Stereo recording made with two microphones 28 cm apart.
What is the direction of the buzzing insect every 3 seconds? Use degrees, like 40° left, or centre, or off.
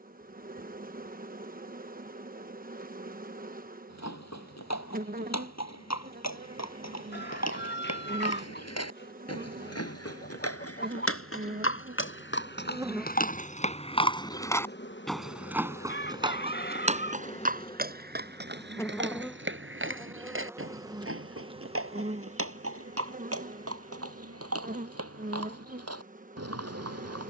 30° right, 30° right, 30° right, 30° right, 10° left, 30° left, centre, 30° right, 30° right.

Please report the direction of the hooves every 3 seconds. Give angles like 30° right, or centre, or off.
off, 80° left, 80° left, 60° left, 30° left, 20° right, 50° right, 60° right, 60° right.